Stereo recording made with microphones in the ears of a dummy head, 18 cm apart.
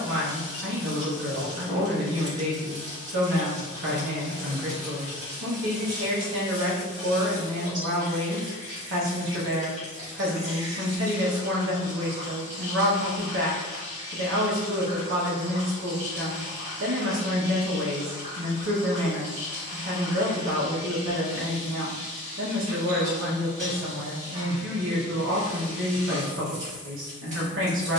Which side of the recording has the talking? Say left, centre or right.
right.